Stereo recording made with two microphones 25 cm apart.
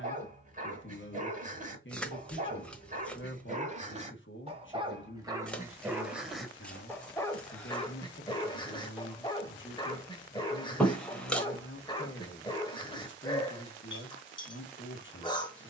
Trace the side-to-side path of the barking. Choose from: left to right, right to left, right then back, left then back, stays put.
right to left.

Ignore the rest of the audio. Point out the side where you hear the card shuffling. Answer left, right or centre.
centre.